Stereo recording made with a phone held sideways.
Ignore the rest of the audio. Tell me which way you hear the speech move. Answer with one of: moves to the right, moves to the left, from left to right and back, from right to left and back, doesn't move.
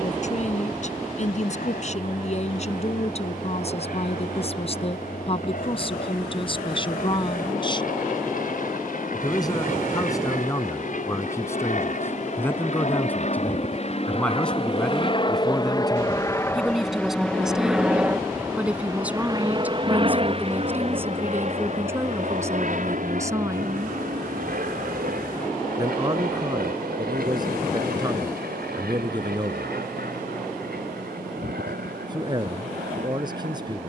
moves to the right.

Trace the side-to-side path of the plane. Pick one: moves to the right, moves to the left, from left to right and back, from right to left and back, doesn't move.
moves to the right.